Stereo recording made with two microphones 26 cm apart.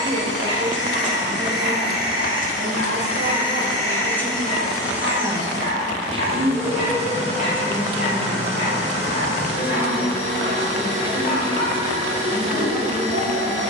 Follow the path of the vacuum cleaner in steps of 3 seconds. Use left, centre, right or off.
left, centre, right, right, right.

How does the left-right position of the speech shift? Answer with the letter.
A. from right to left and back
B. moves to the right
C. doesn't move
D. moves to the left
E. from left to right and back
D.